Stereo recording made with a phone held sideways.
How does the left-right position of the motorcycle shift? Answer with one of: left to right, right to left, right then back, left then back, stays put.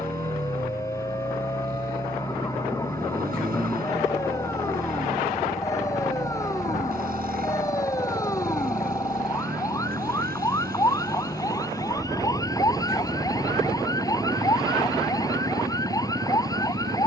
stays put.